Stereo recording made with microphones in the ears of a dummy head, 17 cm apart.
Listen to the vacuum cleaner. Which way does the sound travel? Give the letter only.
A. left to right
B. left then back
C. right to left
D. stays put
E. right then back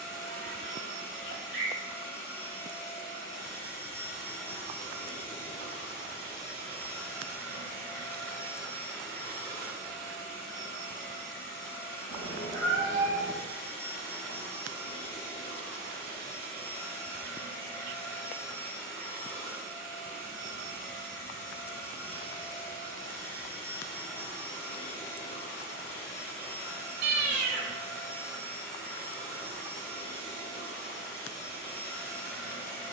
D.